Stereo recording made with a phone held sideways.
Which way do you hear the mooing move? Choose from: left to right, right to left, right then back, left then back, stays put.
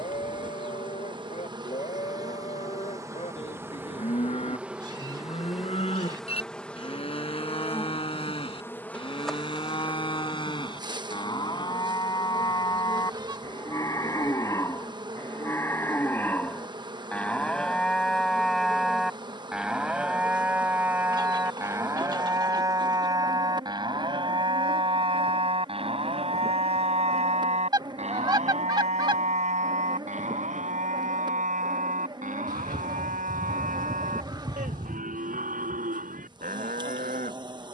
left to right.